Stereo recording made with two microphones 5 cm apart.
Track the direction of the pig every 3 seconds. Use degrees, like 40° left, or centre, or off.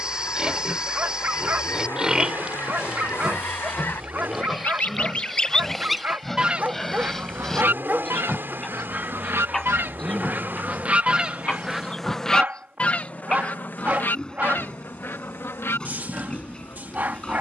20° right, centre, 10° left, 10° left, 20° left, 20° left.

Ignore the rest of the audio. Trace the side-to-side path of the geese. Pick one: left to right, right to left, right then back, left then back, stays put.
right then back.